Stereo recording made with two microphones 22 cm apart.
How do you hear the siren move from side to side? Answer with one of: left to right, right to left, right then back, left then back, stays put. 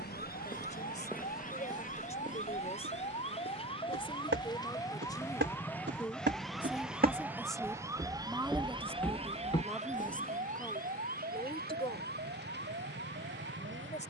left to right.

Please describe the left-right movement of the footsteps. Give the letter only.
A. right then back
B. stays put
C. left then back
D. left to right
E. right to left
A.